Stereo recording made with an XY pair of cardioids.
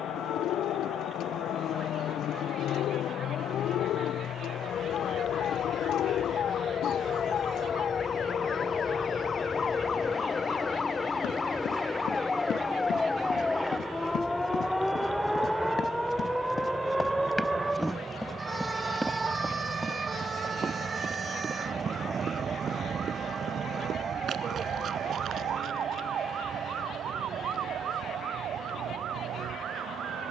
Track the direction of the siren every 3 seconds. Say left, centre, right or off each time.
left, left, left, left, centre, centre, right, right, right, right.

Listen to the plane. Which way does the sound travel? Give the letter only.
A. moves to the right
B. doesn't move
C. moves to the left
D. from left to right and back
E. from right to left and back
A.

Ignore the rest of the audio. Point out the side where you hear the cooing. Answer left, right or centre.
left.